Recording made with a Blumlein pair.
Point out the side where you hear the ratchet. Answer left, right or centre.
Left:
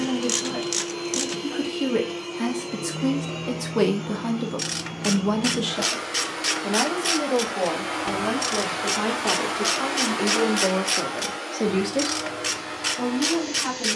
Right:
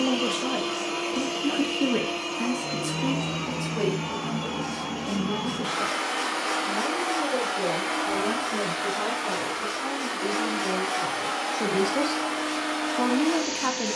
left.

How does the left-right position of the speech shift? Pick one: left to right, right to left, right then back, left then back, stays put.
left then back.